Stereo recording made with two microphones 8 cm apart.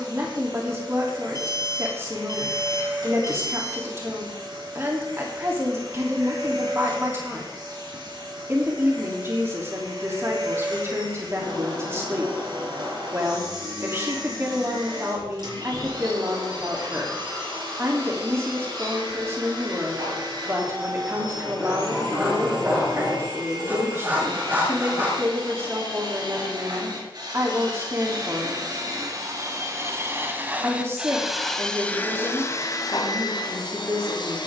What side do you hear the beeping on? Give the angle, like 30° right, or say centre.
40° left.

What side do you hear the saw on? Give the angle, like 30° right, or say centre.
20° right.